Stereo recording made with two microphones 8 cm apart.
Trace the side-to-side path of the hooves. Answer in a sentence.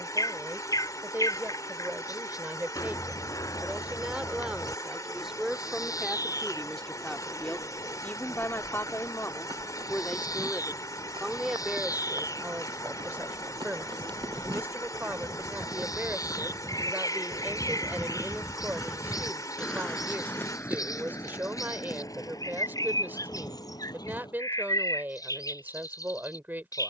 You can hear the hooves go from the right side to the left.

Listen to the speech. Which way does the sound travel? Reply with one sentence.
In this clip you hear the speech go left and come back.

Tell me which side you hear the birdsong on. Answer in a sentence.
In this clip you hear the birdsong on the left.